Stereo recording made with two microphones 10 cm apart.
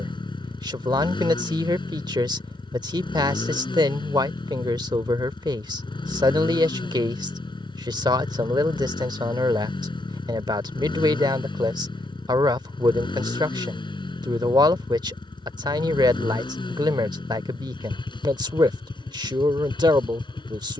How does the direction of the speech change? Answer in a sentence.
In this clip you hear the speech stay put.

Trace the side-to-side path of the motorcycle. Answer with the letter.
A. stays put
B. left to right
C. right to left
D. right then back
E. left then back
A.